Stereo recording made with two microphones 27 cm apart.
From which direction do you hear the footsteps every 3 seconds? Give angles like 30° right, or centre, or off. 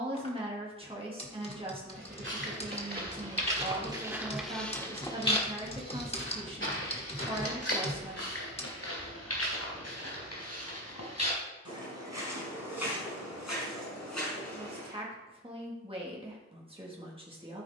40° right, centre, 50° left, 70° left, 80° left, off.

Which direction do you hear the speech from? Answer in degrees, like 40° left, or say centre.
20° right.